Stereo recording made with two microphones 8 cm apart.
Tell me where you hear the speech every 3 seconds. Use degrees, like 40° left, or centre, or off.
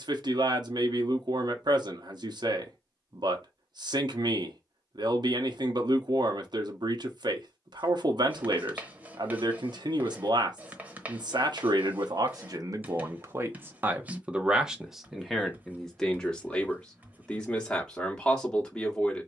70° right, 70° right, 70° right, 70° right, 30° right, 10° left, 10° left.